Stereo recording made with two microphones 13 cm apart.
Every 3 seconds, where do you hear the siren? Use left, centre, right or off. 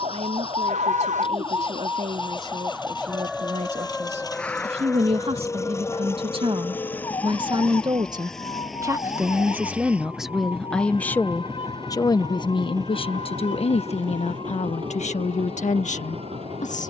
right, centre, left, left, left, left.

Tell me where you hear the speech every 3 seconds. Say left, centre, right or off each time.
right, right, right, centre, left, left.